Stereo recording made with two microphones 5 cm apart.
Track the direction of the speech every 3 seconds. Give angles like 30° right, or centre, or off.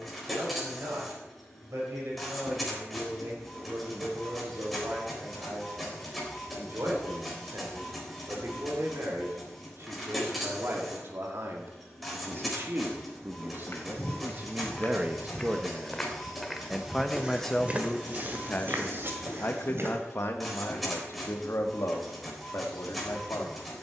70° right, 70° right, 60° right, 60° right, 40° right, centre, 50° left, 70° left.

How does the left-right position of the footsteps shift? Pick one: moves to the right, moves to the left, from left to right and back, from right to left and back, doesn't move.
moves to the right.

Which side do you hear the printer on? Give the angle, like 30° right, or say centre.
centre.